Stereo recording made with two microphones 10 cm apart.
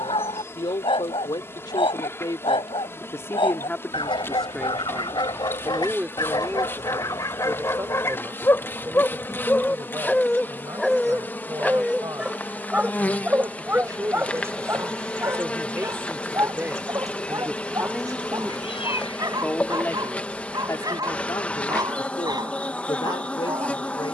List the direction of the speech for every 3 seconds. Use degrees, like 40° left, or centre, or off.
50° left, 10° left, 30° right, 50° right, 40° right, 20° right, 20° left, 50° left.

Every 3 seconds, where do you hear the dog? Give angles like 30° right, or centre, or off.
60° left, 50° left, 30° left, centre, 20° right, 40° right, 40° right, 40° right.